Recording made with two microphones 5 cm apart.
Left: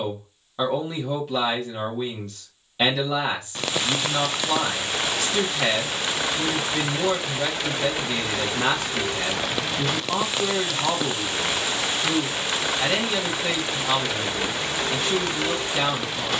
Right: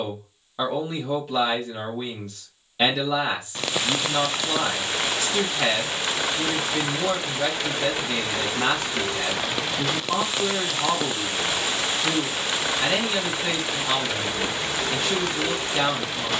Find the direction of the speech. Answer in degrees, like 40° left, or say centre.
centre.